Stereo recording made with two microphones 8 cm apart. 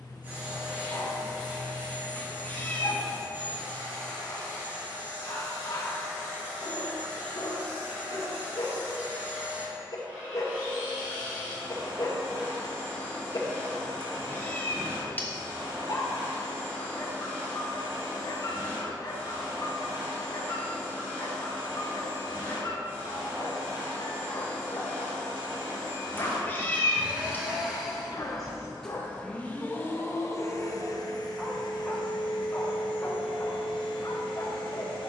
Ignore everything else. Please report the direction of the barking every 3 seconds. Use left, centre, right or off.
left, left, left, left, left, left, left, left, left, left, centre, left.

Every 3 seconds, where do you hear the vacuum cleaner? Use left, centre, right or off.
right, right, right, right, right, right, right, right, right, centre, left, left.